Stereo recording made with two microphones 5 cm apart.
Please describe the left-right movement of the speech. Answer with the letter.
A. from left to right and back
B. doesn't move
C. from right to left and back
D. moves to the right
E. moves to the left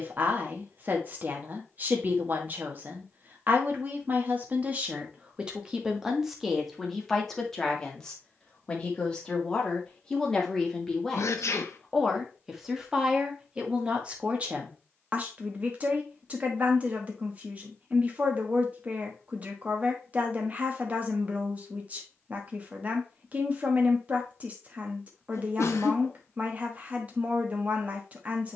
C.